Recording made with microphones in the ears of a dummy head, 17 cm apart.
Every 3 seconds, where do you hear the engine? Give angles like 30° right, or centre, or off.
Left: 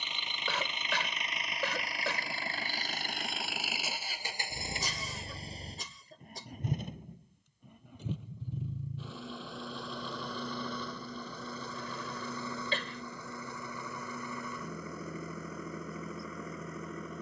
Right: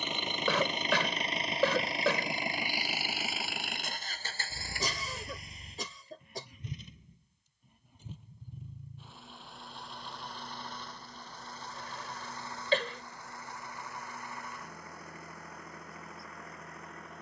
20° right, 20° left, 50° left, 70° left, 70° left, 80° left.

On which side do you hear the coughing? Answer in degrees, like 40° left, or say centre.
60° right.